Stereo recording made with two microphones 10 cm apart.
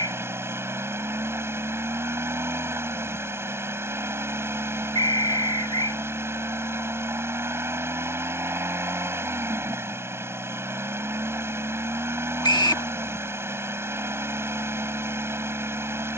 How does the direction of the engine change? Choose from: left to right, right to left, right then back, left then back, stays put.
stays put.